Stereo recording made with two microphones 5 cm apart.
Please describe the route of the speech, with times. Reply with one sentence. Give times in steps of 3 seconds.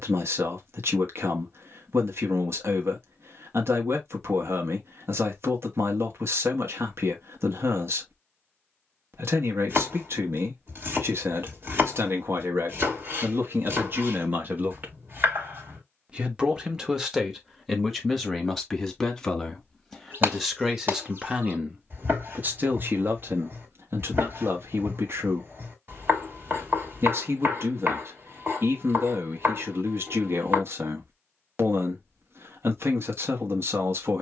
You can hear the speech on the right from 0 s, in the centre from 15 s and on the right from 21 s.